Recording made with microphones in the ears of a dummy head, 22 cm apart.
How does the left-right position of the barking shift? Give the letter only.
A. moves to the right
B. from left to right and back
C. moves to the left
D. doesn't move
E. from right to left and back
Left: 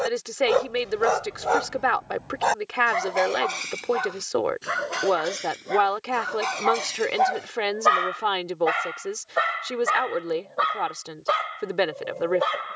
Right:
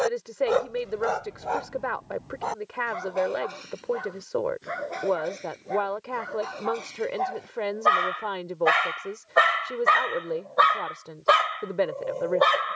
E.